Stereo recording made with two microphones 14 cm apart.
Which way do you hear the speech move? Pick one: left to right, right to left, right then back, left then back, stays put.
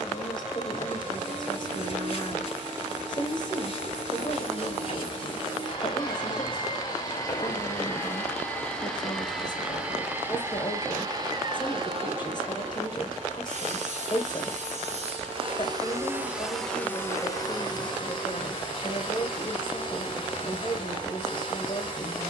stays put.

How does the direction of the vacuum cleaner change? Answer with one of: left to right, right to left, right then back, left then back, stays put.
right then back.